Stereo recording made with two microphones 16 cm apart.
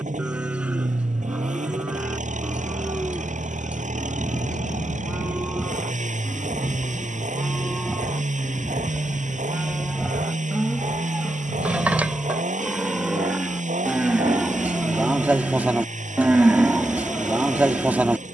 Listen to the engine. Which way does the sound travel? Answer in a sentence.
In this clip you hear the engine stay in one place.